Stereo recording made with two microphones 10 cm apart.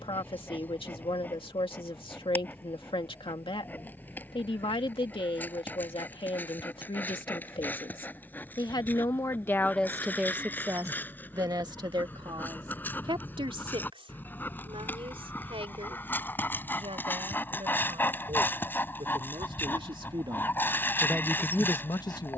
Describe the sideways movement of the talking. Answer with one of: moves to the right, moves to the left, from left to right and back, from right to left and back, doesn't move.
from left to right and back.